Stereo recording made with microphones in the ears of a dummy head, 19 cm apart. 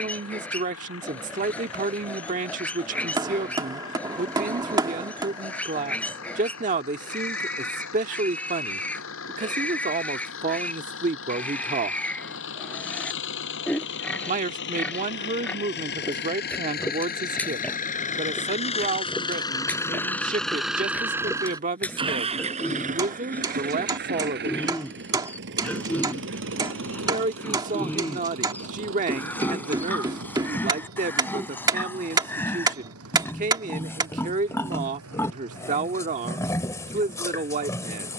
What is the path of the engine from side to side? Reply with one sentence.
You can hear the engine move from left to right.